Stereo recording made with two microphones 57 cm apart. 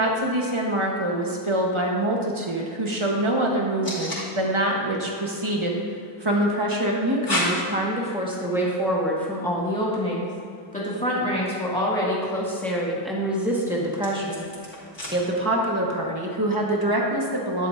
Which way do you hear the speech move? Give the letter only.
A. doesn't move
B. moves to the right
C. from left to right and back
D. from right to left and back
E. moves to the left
D.